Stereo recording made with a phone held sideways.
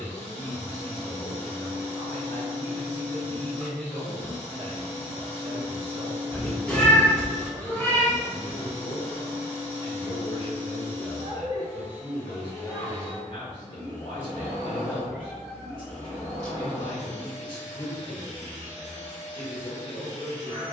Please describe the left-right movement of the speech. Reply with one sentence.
You can hear the speech go right and come back.